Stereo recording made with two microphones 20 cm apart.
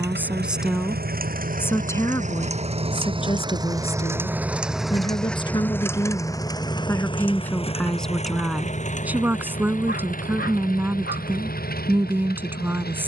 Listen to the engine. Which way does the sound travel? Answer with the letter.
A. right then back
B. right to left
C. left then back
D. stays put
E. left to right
B.